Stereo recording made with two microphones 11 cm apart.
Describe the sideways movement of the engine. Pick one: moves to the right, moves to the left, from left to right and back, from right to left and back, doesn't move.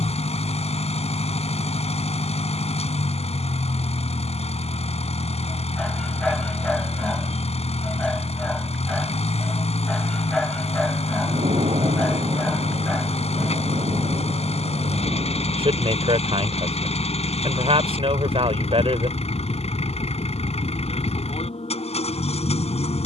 doesn't move.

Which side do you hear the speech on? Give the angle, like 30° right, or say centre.
60° right.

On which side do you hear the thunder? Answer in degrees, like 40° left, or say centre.
60° right.